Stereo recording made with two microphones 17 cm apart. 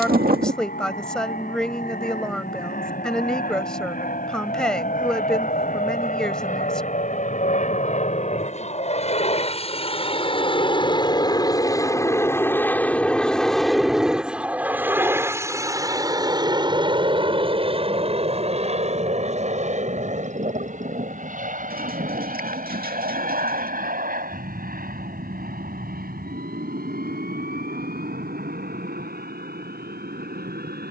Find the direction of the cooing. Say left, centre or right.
right.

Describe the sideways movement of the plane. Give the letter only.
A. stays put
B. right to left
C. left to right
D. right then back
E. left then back
C.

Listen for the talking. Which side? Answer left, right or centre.
centre.